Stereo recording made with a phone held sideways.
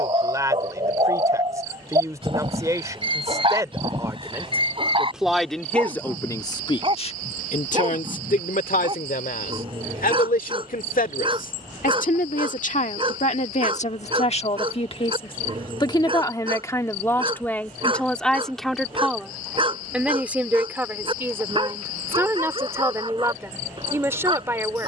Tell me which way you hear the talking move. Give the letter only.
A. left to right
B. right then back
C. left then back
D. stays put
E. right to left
C.